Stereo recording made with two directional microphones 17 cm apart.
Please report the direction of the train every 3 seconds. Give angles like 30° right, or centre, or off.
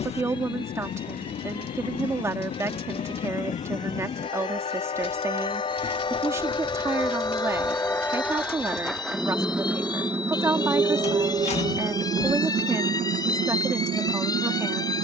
50° left, 40° left, 20° left, 20° right, 50° right.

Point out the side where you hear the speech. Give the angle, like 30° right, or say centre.
20° right.